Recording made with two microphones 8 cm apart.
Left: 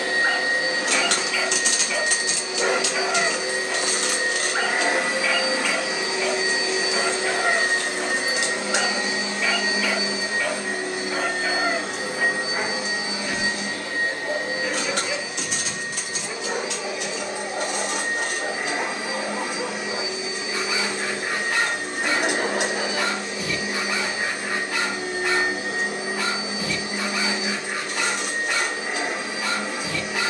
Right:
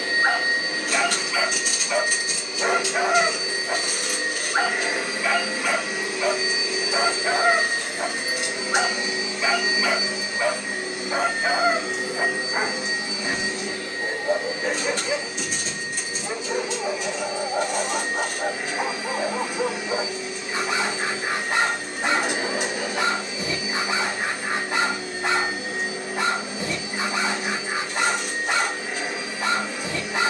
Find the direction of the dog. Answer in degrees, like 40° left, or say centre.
20° right.